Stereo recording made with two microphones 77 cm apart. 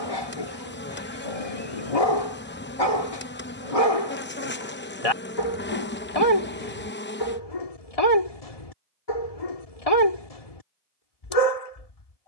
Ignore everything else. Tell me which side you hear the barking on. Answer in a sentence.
You can hear the barking on the left.